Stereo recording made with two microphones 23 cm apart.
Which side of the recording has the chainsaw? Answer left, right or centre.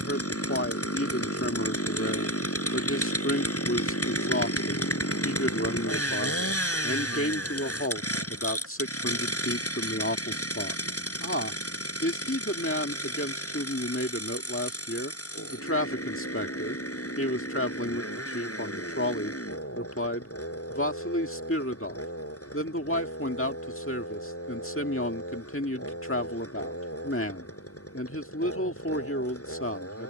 left.